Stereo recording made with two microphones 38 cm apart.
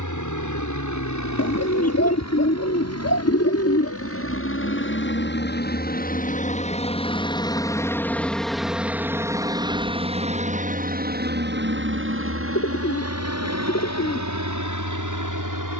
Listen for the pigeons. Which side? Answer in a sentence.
In this clip you hear the pigeons on the left.